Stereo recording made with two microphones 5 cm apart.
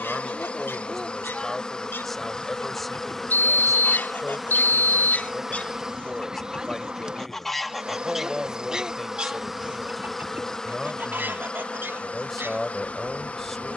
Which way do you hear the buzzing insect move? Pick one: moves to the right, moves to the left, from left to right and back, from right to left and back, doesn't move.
from left to right and back.